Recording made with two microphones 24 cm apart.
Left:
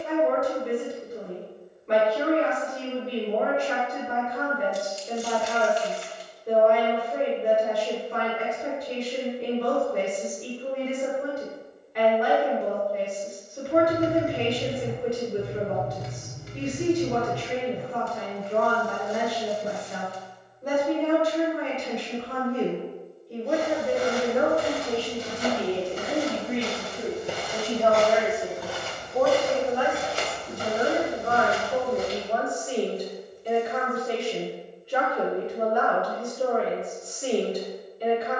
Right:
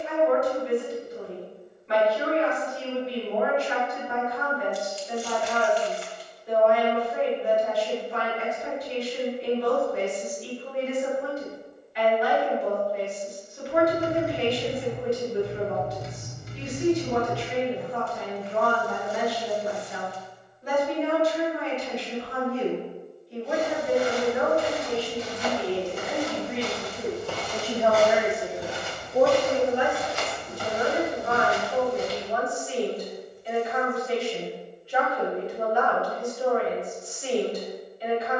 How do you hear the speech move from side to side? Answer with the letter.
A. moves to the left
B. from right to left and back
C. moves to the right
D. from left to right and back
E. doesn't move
D.